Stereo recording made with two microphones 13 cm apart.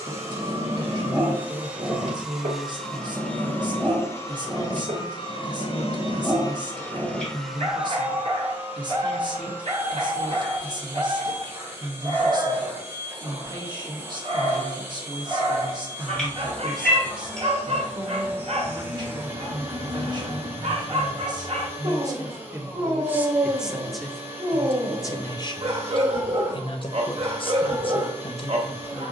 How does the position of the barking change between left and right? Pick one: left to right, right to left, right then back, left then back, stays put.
stays put.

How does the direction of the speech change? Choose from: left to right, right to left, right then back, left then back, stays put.
right to left.